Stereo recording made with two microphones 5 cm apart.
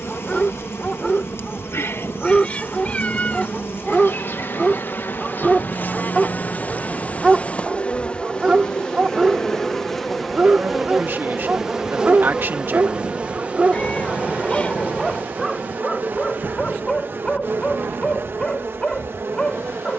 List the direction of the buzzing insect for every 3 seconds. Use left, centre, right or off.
left, left, left, centre, right, right, right.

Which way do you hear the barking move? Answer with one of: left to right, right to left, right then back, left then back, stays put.
right then back.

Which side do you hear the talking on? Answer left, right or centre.
right.